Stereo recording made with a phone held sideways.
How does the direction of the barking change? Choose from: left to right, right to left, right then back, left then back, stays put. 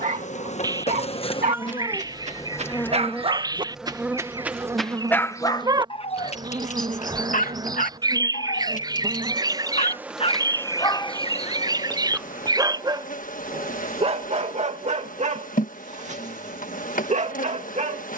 left then back.